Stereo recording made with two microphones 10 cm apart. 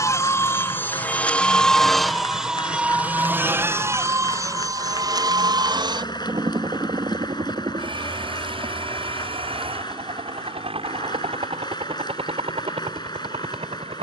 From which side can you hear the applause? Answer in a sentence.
In this clip you hear the applause on the left.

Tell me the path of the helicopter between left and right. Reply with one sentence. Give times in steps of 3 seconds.
You can hear the helicopter in the centre from 0 s and on the right from 3 s.